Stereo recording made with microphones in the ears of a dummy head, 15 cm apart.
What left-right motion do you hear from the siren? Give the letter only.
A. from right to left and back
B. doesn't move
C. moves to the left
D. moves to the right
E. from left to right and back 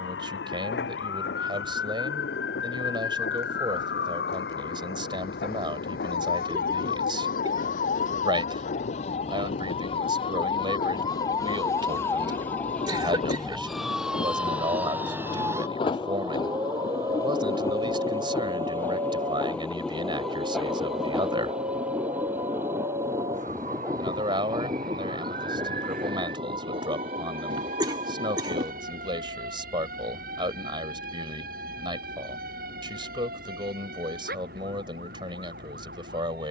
D.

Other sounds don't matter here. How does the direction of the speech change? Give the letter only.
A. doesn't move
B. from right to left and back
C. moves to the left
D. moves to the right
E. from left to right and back
A.